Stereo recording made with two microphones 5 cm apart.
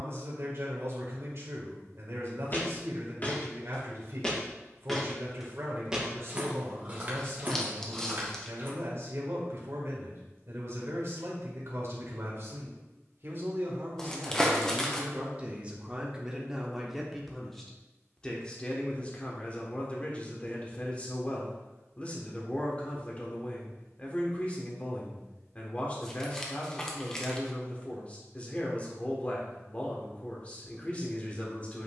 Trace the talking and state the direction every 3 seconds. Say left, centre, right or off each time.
right, right, right, right, right, centre, left, left, left, left, left.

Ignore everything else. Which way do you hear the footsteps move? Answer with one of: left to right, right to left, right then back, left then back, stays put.
left to right.